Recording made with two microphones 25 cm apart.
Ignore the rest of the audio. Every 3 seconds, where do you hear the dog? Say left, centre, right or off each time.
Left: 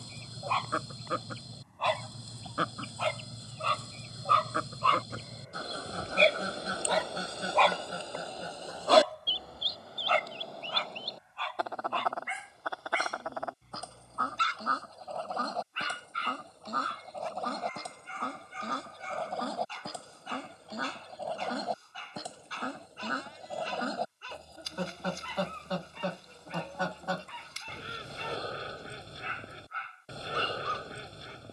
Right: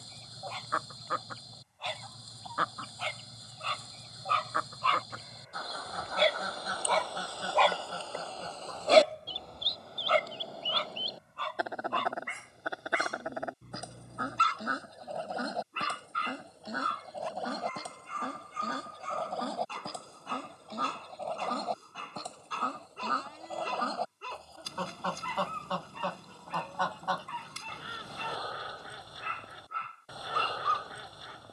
left, left, centre, right, right, right, right, right, right, right, right.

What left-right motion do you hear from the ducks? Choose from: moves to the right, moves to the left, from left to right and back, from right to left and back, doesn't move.
from left to right and back.